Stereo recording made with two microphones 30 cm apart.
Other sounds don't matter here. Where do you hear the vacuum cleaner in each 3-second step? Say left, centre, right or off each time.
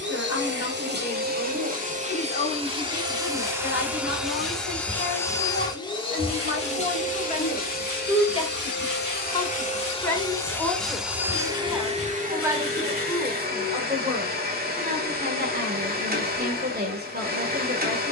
right, centre, left, centre, right, right.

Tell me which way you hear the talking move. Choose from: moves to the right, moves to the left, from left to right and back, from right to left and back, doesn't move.
moves to the right.